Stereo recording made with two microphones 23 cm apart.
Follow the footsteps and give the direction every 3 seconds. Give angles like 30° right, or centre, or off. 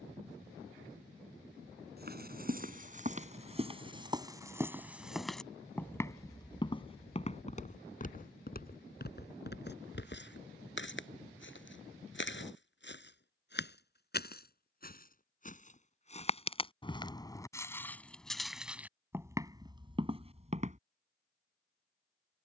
40° right, 10° right, 30° left, 50° left, 50° left, 20° left, 10° right, off.